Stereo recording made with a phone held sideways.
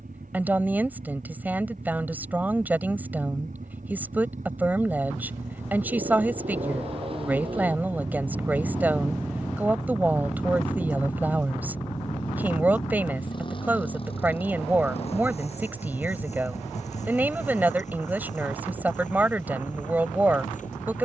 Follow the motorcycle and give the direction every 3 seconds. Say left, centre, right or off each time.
right, right, right, centre, left, left, left.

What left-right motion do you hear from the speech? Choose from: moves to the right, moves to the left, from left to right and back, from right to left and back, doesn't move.
doesn't move.